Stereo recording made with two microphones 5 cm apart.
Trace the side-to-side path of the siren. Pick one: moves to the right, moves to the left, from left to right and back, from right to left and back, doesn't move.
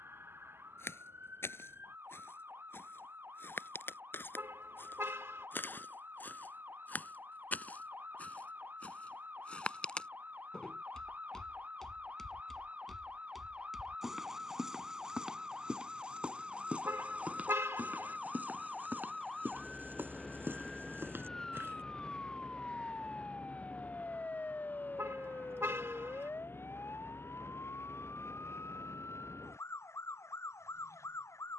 moves to the left.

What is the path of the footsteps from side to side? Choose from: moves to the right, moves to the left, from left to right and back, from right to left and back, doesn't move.
moves to the right.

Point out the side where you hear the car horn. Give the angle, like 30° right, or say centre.
50° right.